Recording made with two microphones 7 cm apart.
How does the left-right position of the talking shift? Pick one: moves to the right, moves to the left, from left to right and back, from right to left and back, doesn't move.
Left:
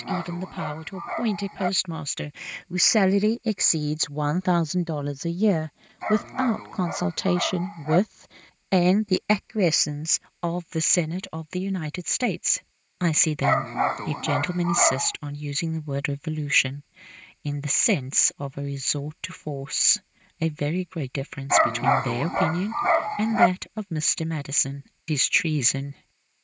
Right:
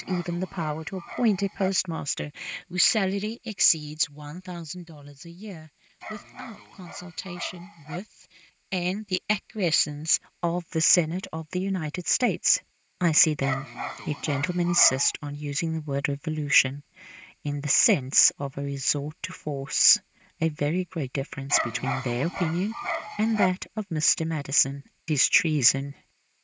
from right to left and back.